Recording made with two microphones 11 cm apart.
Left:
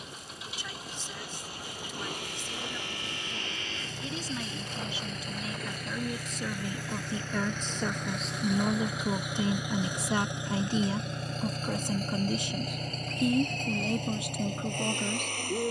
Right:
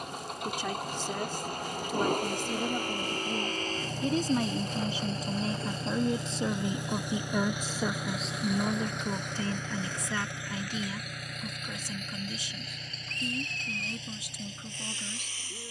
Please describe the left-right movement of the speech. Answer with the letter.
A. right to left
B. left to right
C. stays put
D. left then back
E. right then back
A.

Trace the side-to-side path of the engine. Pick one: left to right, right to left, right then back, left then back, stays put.
right to left.